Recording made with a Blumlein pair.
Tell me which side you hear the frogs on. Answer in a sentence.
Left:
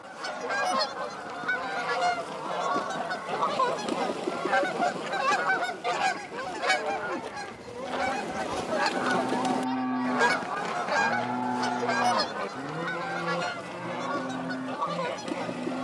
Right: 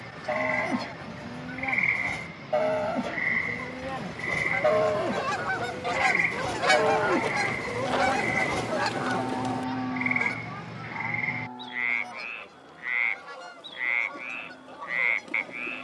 You can hear the frogs on the right.